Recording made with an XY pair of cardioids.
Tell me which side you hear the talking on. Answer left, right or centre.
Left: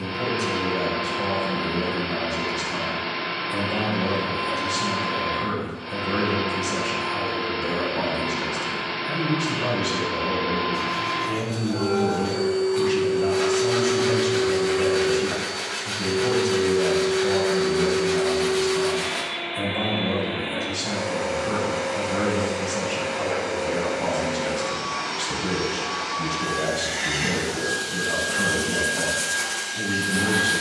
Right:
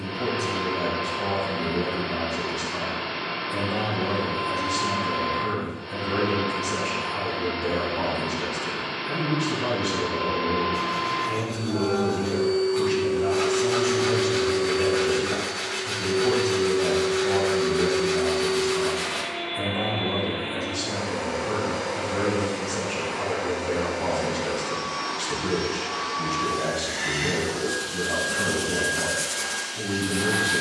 left.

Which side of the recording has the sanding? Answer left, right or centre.
centre.